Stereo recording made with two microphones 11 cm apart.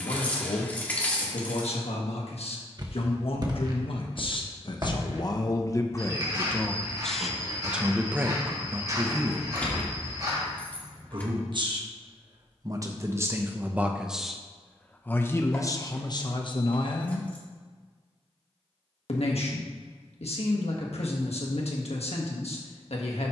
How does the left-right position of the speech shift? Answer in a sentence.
In this clip you hear the speech move from left to right and back again.